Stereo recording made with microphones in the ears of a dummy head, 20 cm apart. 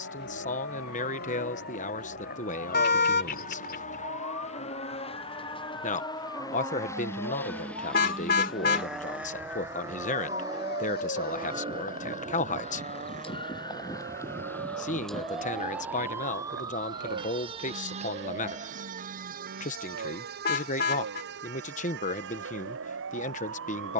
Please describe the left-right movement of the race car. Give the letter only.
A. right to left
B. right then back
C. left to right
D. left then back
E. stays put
C.